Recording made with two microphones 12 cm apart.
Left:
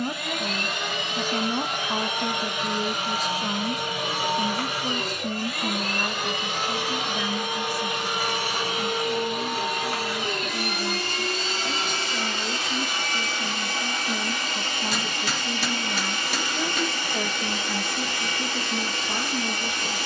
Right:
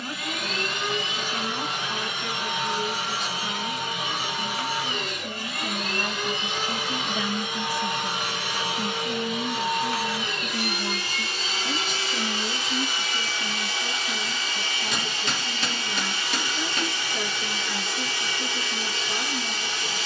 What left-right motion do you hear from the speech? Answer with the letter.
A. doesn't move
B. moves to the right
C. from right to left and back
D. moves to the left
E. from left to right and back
E.